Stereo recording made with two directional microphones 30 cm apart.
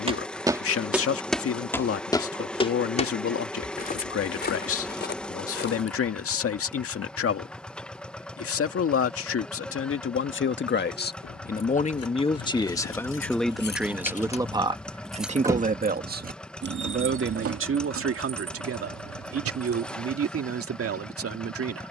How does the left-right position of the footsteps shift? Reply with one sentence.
In this clip you hear the footsteps go from the right side to the left.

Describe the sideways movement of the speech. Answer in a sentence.
In this clip you hear the speech travel towards the right.